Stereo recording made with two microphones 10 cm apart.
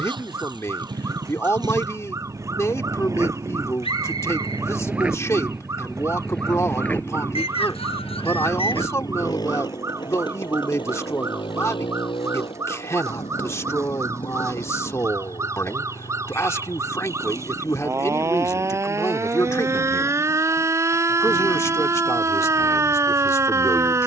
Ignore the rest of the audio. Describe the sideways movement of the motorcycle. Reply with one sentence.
You can hear the motorcycle move to the left.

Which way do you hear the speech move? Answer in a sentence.
You can hear the speech stay put.